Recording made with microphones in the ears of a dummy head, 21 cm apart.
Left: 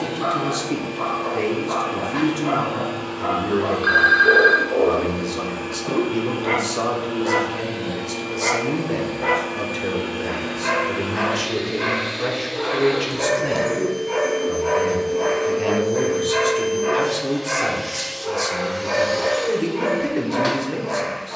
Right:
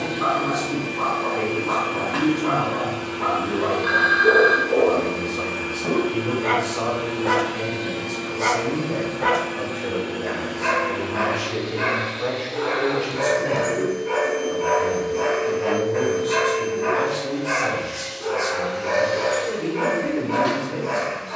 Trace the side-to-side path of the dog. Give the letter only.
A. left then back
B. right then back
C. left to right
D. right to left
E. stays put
E.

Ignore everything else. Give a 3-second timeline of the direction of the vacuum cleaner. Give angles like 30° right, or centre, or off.
30° right, 30° right, 30° right, 10° left, 40° left, 60° left, 60° left.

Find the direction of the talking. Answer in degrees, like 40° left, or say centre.
50° left.